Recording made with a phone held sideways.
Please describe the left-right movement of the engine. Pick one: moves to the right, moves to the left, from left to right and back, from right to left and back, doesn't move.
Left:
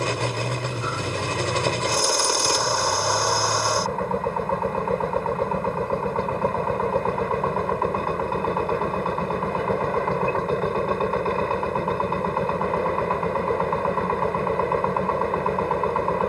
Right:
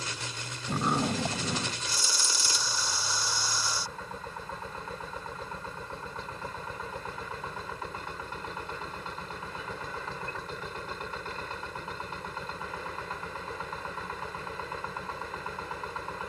doesn't move.